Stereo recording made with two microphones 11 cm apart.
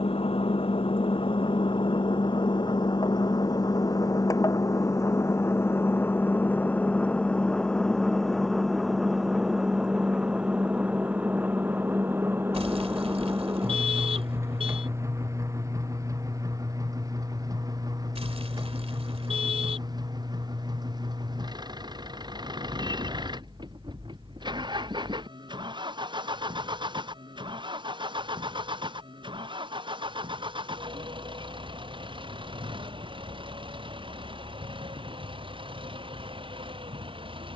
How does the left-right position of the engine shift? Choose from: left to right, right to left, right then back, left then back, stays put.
left to right.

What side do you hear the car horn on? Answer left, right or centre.
right.